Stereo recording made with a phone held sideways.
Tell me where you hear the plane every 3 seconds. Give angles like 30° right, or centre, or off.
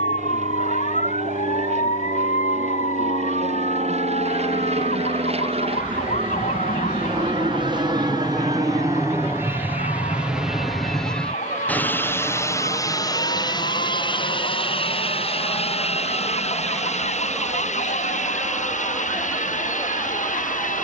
70° right, 60° right, 40° right, centre, 30° left, 50° left, 60° left.